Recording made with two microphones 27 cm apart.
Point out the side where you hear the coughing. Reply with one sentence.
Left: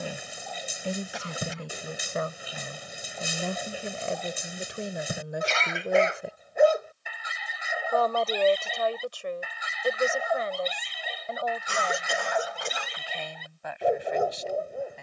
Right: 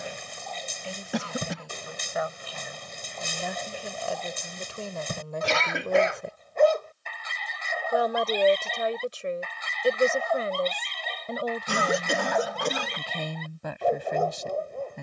You can hear the coughing on the right.